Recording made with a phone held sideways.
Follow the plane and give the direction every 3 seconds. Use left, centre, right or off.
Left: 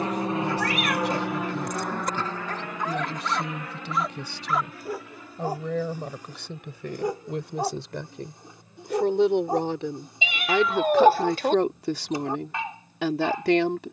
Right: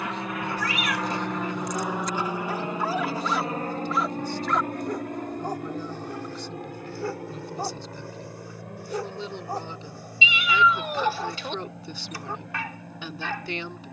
centre, right, right, right, right.